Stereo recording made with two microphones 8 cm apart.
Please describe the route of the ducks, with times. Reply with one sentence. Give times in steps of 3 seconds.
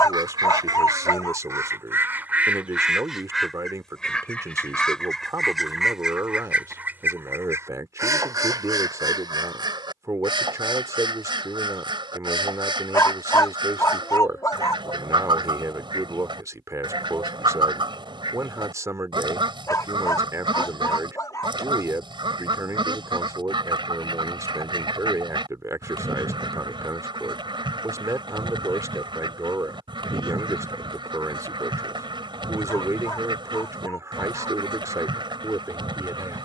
You can hear the ducks on the right from 0 s, in the centre from 3 s and on the right from 6 s.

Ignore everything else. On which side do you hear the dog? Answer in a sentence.
In this clip you hear the dog on the left.